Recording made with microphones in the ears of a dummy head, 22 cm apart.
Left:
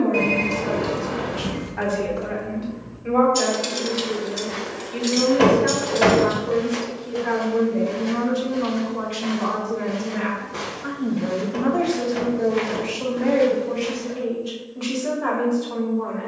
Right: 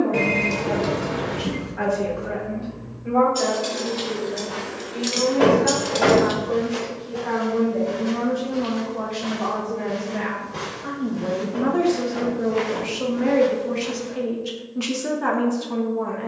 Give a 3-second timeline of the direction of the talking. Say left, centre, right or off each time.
left, left, left, centre, right, right.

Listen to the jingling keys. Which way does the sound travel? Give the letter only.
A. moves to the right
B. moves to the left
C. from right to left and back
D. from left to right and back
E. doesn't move
A.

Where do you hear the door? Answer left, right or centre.
left.